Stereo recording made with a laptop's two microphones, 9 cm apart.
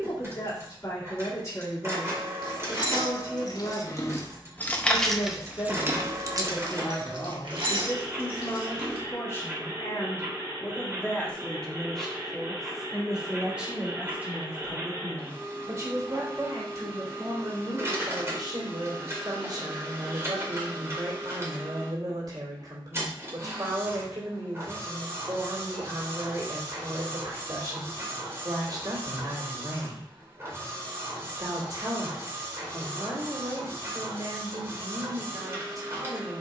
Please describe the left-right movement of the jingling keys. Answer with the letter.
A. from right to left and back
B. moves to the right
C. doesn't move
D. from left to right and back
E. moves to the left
B.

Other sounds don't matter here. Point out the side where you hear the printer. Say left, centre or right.
right.